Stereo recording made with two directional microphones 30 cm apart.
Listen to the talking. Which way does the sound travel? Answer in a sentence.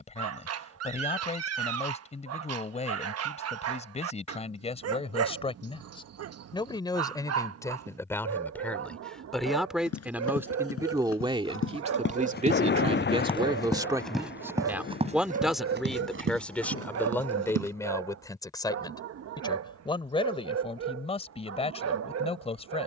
In this clip you hear the talking go right and come back.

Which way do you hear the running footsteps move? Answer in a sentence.
In this clip you hear the running footsteps go from the left side to the right.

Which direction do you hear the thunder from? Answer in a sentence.
You can hear the thunder on the left.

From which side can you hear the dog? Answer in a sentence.
You can hear the dog on the right.